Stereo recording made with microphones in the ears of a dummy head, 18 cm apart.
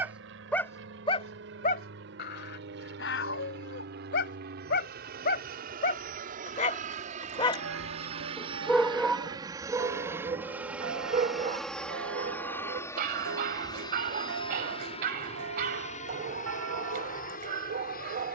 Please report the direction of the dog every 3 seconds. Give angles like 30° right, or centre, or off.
40° left, 60° left, 20° left, 20° right, 50° right, 50° right.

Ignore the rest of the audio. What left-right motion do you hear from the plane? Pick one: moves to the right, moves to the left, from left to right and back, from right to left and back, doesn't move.
moves to the left.